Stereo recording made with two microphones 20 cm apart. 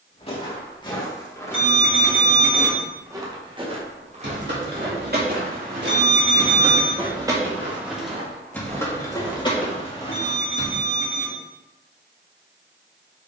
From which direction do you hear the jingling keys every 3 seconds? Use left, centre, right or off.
off, right, centre, left, off.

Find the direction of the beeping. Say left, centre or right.
right.